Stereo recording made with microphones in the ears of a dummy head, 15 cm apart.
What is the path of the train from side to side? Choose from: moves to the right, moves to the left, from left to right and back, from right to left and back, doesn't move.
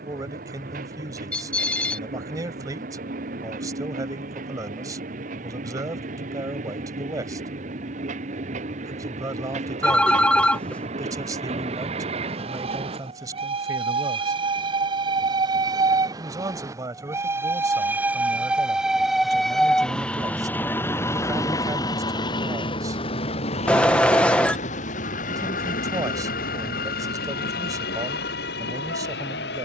moves to the left.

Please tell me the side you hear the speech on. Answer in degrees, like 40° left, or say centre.
20° right.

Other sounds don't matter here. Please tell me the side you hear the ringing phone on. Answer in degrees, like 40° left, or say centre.
10° left.